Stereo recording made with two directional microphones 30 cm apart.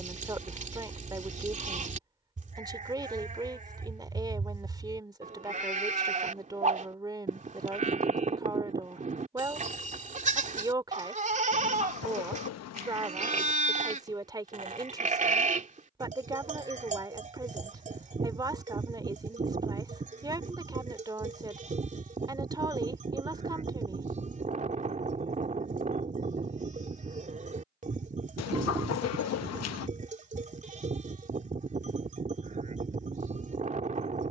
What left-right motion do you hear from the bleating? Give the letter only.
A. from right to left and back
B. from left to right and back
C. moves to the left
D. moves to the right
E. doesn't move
E.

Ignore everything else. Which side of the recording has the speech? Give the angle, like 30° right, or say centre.
10° right.